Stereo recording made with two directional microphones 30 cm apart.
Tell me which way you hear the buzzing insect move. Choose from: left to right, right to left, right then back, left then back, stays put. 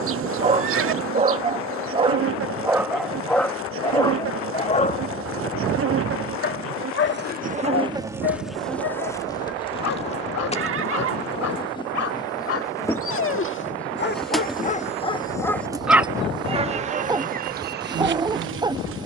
left then back.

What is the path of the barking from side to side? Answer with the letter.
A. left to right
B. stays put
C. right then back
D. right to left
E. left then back
E.